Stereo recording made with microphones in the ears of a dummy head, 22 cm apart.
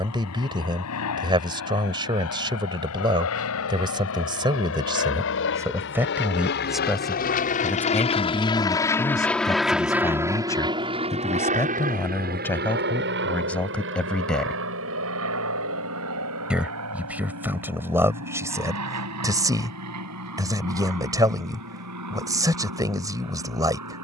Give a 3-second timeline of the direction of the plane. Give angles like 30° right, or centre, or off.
70° left, 60° left, 30° left, 10° right, 50° right, 60° right, 70° right, 70° right.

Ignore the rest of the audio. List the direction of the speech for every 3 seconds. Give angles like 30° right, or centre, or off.
20° right, 20° right, centre, 10° left, 10° left, 10° right, 10° right, 10° right.